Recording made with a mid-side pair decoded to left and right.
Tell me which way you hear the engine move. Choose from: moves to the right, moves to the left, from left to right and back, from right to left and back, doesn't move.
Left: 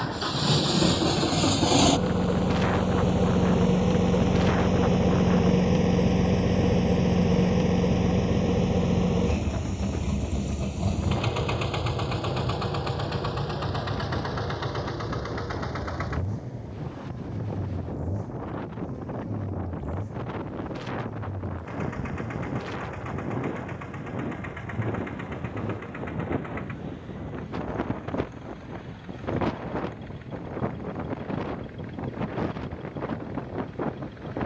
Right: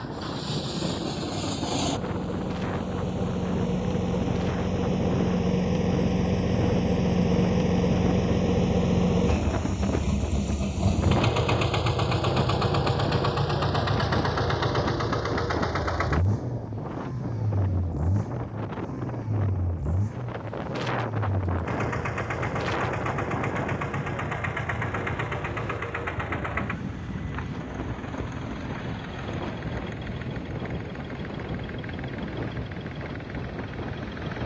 moves to the right.